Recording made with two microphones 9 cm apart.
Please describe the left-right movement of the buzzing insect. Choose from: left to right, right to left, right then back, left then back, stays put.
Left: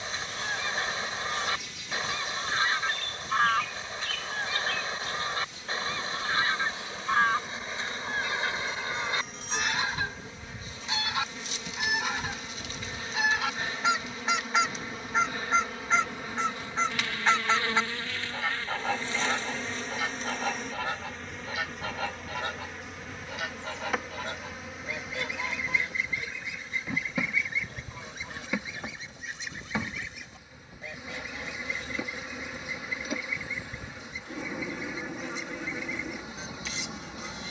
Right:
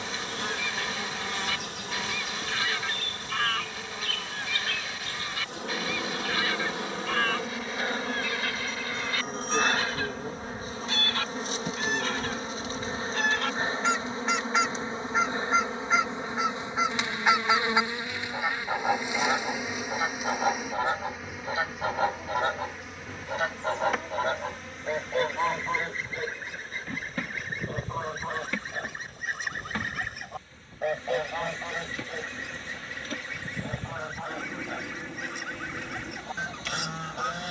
right to left.